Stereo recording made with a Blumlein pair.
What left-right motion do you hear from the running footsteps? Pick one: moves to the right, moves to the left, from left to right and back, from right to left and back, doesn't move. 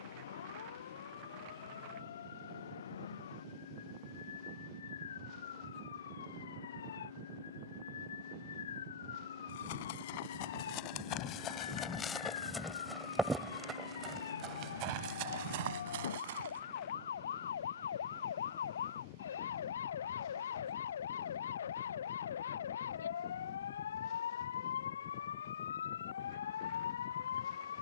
moves to the right.